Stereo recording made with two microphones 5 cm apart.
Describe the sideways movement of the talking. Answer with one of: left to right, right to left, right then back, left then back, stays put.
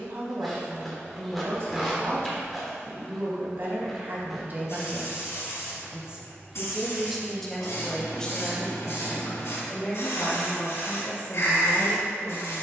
right to left.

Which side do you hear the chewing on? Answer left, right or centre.
centre.